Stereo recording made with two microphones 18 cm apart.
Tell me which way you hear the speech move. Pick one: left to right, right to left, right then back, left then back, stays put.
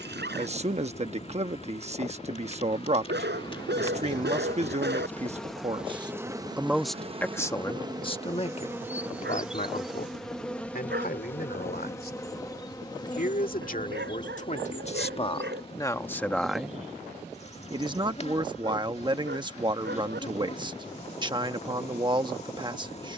left then back.